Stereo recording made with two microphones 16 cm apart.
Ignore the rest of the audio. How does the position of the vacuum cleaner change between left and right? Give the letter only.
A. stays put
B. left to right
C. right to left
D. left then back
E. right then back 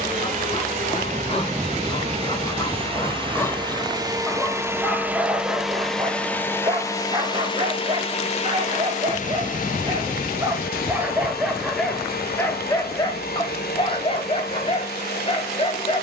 C.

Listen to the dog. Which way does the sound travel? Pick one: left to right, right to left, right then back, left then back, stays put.
right then back.